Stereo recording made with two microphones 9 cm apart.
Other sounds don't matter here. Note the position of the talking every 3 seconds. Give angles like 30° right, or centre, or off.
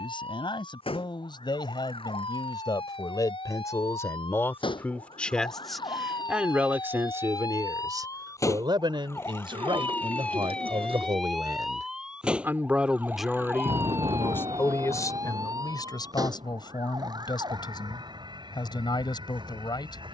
50° left, 20° left, 30° right, 50° right, centre, 50° left, 50° left.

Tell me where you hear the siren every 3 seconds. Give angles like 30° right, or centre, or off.
70° left, 60° left, 40° left, 10° left, 20° right, 40° right, 50° right.